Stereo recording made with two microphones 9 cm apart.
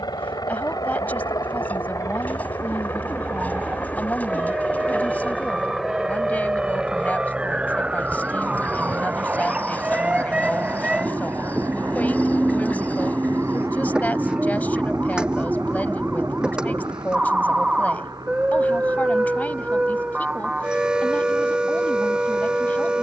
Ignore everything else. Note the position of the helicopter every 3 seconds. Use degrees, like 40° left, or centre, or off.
40° left, 10° left, 10° right, 30° right, 40° right, 50° right, 50° right, 50° right.